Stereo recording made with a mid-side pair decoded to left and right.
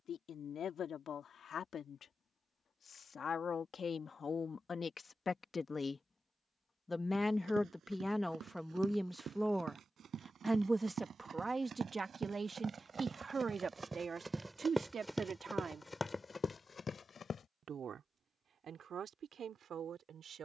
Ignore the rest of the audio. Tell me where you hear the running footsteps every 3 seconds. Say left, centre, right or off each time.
off, off, right, right, right, left, off.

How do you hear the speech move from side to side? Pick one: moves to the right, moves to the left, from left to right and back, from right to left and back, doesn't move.
moves to the right.